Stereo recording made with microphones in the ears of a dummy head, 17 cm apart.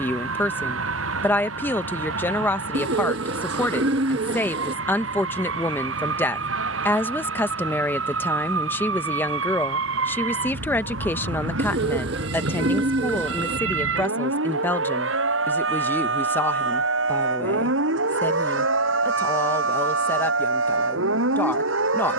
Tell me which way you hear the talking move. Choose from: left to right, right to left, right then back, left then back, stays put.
stays put.